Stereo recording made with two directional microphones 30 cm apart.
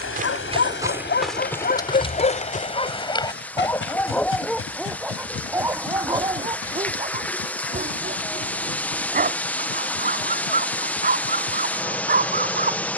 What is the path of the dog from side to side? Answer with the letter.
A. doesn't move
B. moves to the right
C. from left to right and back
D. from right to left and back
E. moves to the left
B.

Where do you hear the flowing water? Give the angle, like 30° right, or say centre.
centre.